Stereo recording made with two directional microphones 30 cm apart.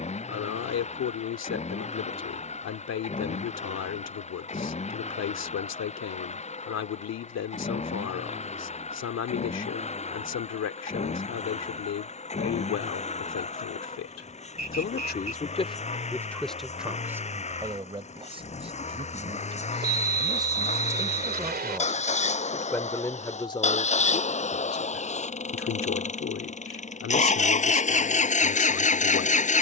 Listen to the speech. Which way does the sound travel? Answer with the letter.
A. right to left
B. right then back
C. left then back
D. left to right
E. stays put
B.